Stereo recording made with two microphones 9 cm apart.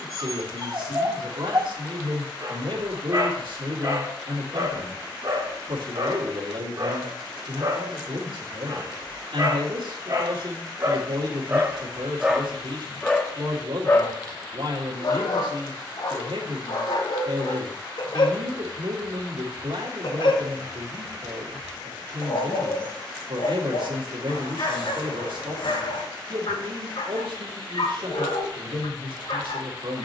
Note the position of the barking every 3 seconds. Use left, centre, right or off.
right, right, right, right, centre, left, left, left, left, left.